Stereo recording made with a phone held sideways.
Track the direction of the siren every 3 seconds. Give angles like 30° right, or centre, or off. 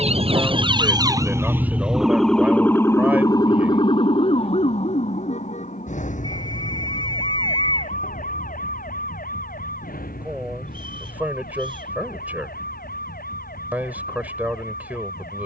10° right, 40° left, 60° left, 70° left, 70° left.